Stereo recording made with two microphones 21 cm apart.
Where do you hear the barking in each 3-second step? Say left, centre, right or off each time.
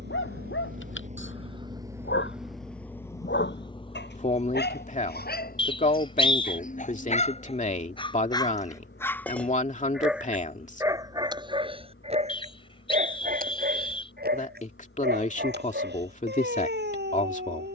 left, left, left, centre, right, right.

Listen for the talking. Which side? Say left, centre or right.
left.